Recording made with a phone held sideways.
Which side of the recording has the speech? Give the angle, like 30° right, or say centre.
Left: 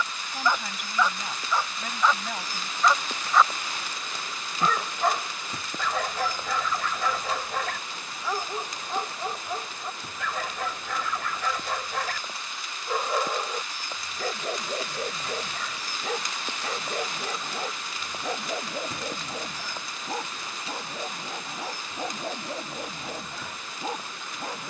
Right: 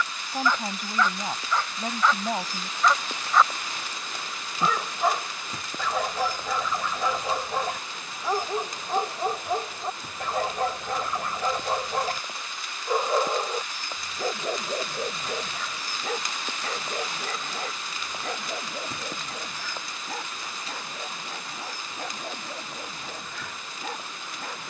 40° right.